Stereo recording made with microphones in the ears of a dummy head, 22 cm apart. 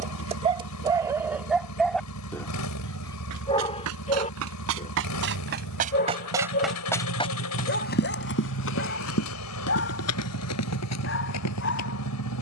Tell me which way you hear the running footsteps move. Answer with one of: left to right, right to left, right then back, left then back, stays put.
right to left.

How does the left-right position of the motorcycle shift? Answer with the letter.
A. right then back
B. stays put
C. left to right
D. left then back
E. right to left
B.